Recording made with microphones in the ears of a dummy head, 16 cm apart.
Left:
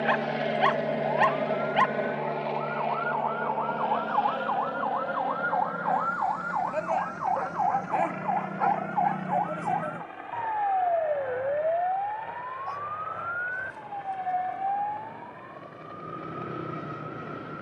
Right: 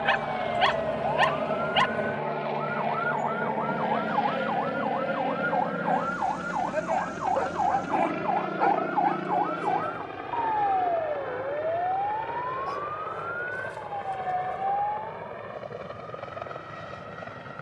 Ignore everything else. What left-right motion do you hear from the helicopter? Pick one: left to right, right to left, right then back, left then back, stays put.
left to right.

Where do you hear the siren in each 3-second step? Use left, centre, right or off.
right, right, centre, left, left, left.